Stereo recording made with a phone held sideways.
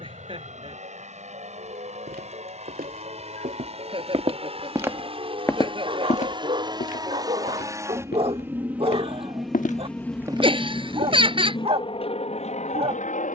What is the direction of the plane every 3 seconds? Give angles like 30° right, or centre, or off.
50° right, 40° right, 20° right, 10° left, 40° left.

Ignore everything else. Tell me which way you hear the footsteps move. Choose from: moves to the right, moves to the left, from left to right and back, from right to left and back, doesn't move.
from right to left and back.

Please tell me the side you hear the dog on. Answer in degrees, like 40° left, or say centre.
40° right.